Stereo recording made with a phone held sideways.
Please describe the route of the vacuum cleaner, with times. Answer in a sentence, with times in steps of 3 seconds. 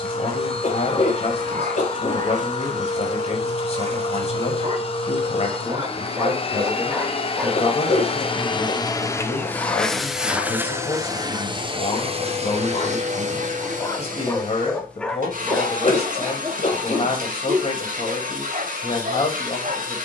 In this clip you hear the vacuum cleaner on the left from 0 s, in the centre from 9 s and on the right from 12 s.